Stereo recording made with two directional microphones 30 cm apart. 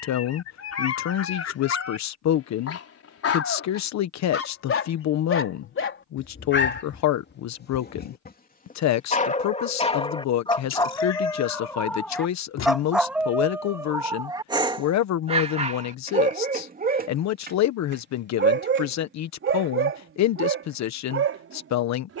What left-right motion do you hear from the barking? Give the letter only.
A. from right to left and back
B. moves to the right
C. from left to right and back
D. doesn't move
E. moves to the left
B.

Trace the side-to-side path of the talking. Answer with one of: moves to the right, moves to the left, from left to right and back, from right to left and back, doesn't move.
doesn't move.